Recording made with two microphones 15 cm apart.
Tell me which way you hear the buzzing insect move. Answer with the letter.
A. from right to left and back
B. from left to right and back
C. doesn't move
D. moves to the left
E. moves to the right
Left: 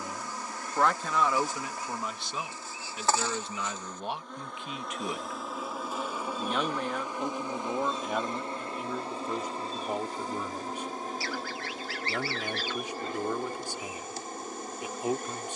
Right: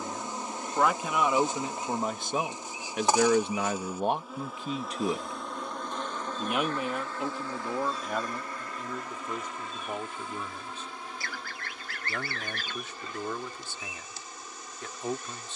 D.